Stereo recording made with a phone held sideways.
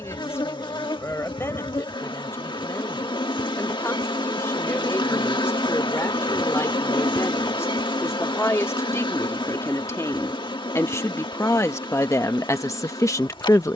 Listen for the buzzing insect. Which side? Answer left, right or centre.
left.